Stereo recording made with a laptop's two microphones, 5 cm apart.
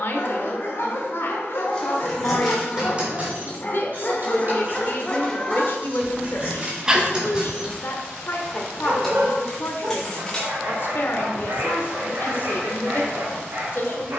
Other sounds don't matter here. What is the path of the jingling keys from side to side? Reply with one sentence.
In this clip you hear the jingling keys go right and come back.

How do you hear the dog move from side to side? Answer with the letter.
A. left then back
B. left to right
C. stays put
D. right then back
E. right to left
B.